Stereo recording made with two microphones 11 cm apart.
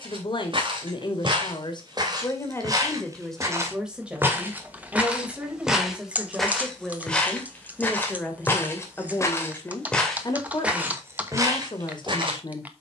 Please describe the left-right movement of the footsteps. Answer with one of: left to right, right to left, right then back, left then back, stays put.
left then back.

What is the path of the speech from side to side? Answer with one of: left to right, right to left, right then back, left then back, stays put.
right then back.